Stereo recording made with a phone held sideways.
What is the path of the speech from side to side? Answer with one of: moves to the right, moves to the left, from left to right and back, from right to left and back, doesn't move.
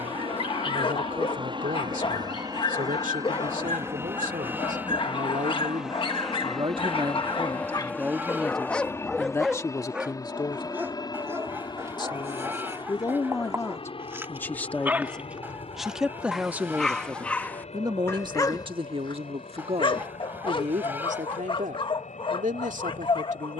from right to left and back.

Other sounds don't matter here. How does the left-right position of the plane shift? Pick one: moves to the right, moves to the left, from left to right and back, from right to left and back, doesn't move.
moves to the left.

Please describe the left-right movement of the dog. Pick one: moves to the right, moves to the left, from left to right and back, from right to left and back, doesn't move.
from left to right and back.